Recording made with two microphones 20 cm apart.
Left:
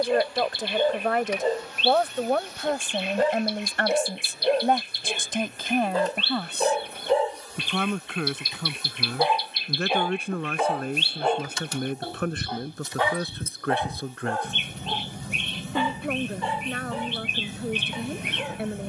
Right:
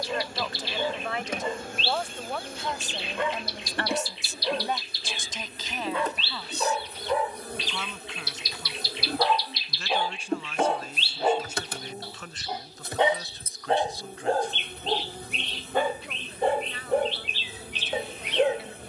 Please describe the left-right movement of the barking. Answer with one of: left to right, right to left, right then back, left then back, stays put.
left to right.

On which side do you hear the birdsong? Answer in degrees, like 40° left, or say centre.
50° left.